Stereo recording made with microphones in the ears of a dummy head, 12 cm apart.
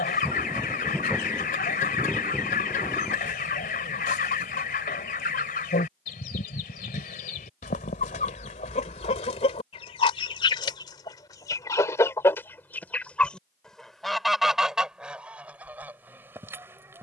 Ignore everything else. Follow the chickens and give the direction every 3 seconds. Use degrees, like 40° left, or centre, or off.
60° left, 60° left, 60° left, 40° left, 10° left, 10° right.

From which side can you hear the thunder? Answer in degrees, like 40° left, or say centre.
centre.